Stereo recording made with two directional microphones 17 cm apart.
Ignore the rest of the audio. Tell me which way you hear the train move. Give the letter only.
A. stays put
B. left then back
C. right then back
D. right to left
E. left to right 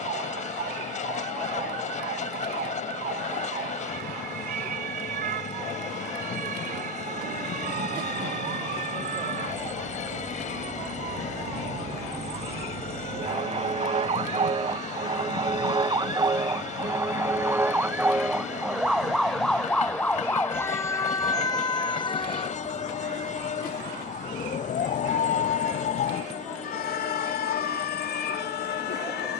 A.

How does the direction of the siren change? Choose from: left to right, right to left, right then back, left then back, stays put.
right to left.